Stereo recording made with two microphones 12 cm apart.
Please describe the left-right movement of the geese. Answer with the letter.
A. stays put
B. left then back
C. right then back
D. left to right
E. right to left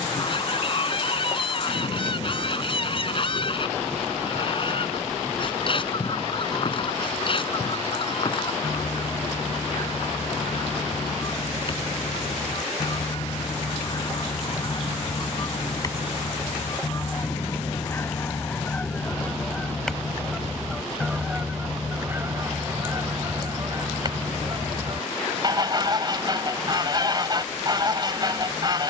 D.